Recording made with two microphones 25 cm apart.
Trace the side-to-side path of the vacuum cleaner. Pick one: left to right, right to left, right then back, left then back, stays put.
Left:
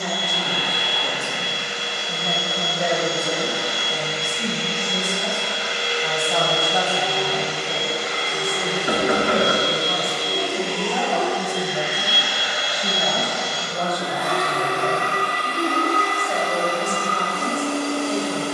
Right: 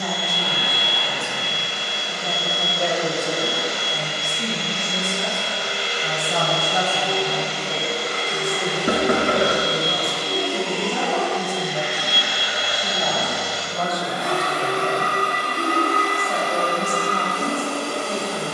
left to right.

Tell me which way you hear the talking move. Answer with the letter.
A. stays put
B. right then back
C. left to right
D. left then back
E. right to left
B.